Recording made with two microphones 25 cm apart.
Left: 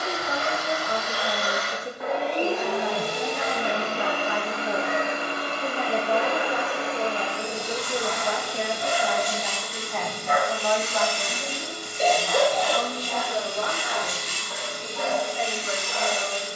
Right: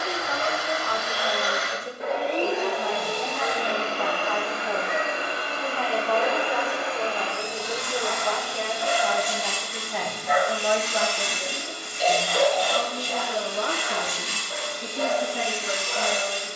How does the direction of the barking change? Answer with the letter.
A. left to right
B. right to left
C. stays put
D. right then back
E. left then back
E.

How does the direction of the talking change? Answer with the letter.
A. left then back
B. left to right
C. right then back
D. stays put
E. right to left
B.